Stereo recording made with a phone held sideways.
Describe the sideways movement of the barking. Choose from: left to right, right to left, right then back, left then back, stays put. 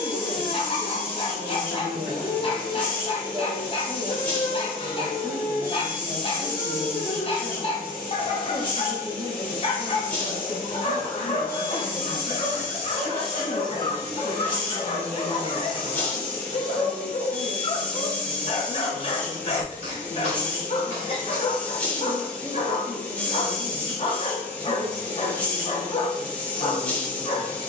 stays put.